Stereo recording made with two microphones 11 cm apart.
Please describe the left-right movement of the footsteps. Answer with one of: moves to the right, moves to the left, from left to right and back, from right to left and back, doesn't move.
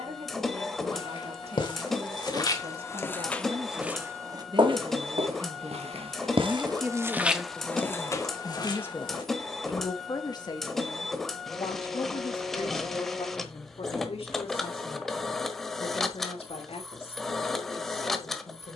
from left to right and back.